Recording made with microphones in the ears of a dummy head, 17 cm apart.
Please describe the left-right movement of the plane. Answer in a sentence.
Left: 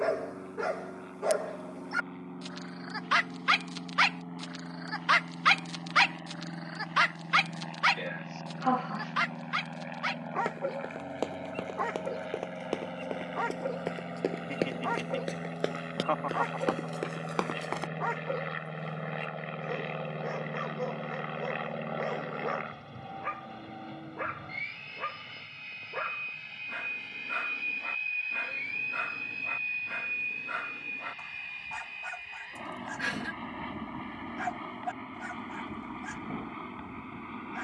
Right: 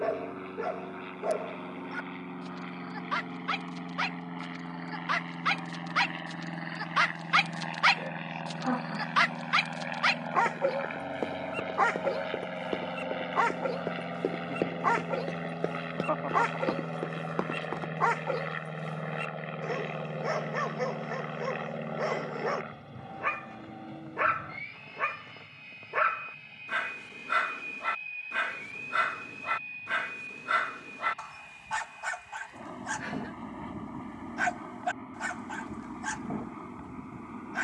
In this clip you hear the plane travel towards the left.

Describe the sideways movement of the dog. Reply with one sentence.
In this clip you hear the dog travel towards the right.